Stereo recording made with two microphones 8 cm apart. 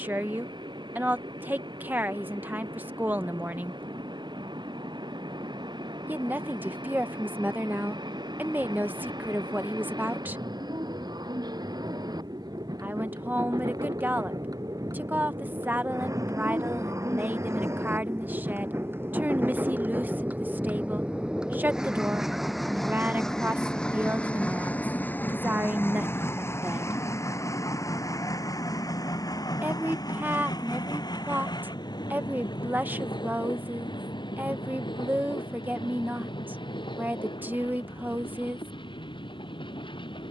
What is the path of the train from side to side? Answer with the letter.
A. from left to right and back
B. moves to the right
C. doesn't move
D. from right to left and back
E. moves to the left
E.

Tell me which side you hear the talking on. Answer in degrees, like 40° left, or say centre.
20° right.